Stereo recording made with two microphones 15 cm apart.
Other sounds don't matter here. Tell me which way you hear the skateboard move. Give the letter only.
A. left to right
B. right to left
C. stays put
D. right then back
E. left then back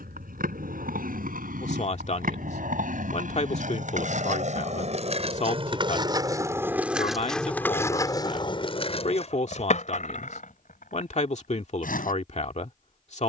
B.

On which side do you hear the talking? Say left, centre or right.
left.